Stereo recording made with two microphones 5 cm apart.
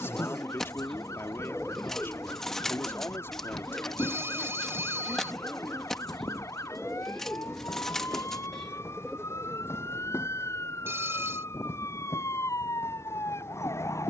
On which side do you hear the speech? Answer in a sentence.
In this clip you hear the speech on the left.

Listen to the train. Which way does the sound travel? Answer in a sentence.
You can hear the train stay put.